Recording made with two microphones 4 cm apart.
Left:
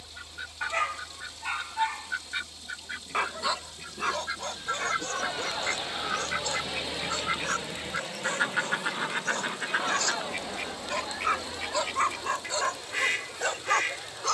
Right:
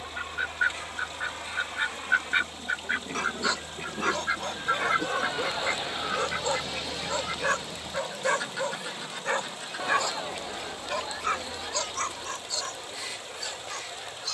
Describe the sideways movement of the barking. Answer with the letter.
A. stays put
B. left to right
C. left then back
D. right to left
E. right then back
E.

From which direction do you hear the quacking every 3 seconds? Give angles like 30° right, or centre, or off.
40° right, 20° right, 20° left, 50° left, 60° left.